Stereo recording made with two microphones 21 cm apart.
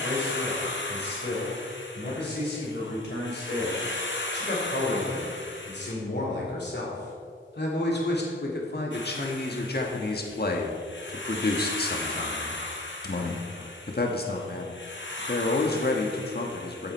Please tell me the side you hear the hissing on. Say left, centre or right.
left.